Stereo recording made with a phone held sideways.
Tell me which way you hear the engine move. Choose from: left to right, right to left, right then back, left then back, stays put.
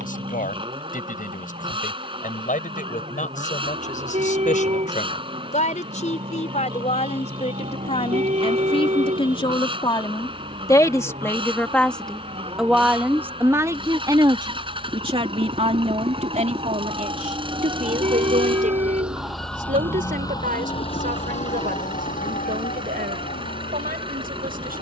stays put.